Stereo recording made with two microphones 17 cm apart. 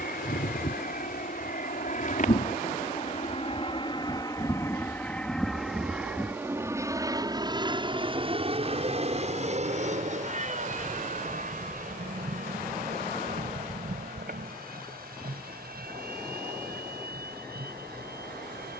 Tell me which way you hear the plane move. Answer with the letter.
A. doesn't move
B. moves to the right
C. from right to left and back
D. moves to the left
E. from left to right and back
B.